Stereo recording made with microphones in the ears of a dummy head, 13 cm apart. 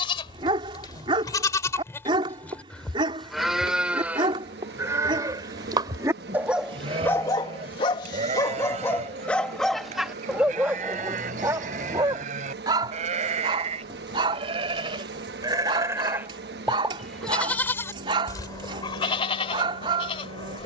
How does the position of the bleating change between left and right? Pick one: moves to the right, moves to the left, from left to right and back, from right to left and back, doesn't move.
from left to right and back.